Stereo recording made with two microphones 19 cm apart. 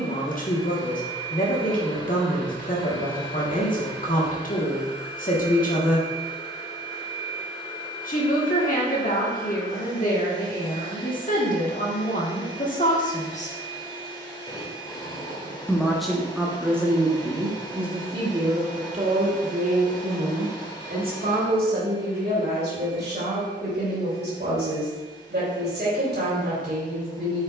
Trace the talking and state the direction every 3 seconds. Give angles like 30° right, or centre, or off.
50° left, 50° left, 50° left, 50° left, 40° left, 10° right, 40° right, 60° right, 60° right.